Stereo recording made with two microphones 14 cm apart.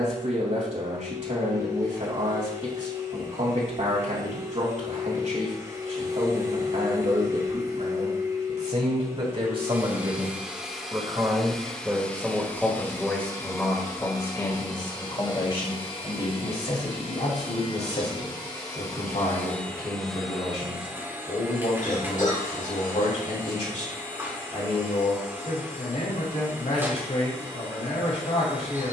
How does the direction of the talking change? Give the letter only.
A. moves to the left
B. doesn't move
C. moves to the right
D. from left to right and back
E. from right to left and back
A.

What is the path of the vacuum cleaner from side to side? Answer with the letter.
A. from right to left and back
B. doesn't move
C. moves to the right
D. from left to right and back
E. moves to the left
A.